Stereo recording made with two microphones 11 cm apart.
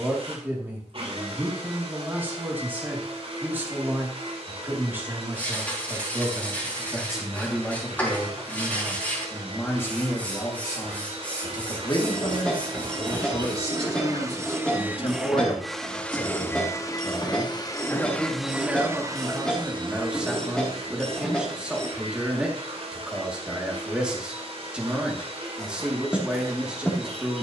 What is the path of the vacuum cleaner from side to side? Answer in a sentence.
In this clip you hear the vacuum cleaner go left and come back.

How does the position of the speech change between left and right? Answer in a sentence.
You can hear the speech go left and come back.